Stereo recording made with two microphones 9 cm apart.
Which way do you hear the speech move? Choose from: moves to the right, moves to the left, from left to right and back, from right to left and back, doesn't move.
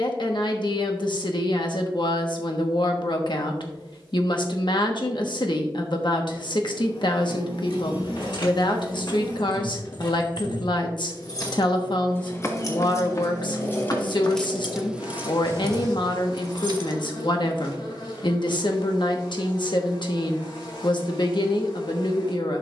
doesn't move.